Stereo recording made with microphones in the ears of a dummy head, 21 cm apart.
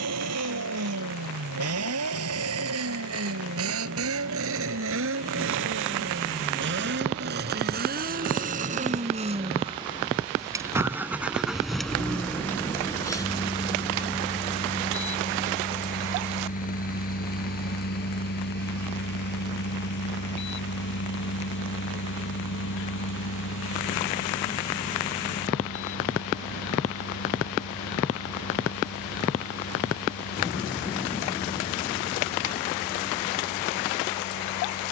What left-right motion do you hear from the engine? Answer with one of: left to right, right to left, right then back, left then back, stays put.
right to left.